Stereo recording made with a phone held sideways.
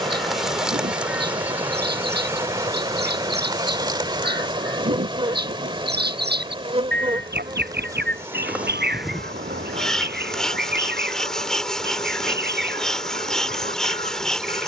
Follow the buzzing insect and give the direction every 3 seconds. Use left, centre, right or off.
centre, right, right, centre, centre.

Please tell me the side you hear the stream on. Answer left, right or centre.
right.